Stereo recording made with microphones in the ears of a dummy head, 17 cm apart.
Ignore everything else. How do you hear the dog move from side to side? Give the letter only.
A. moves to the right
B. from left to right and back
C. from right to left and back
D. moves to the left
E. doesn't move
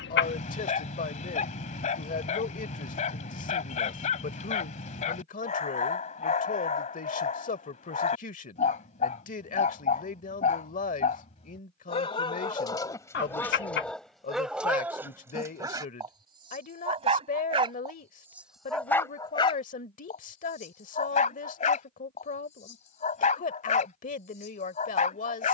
B.